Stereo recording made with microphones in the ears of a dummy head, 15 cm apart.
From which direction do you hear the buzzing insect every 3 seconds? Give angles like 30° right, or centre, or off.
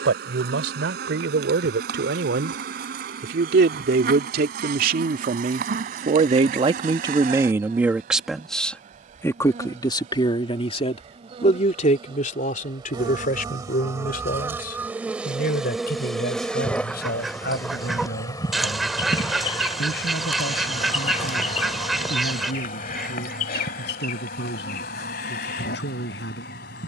60° right, 60° right, 50° right, 40° right, 20° right, centre, 30° left, 50° left, 60° left.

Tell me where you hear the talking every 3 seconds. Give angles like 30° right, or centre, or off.
80° right, 60° right, 20° right, 30° left, 50° left, 60° left, 60° left, 70° left, 70° left.